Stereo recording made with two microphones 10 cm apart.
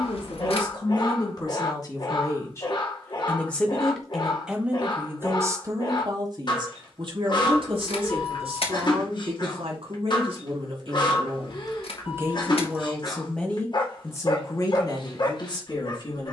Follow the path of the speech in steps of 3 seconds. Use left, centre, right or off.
left, centre, right, right, centre, left.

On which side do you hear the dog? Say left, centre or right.
left.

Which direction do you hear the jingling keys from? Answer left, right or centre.
left.